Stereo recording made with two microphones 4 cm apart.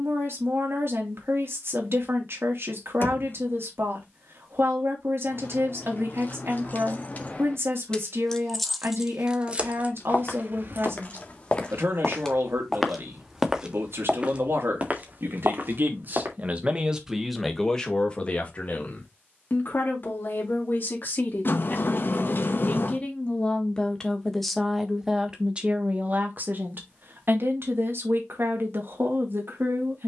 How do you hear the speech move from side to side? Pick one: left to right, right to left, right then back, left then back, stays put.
left then back.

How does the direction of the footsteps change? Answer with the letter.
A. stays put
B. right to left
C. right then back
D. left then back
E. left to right
E.